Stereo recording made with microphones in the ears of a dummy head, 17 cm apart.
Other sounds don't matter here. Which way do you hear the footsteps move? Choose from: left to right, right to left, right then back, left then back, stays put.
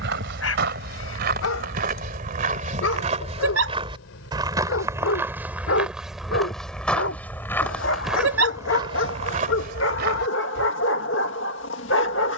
left then back.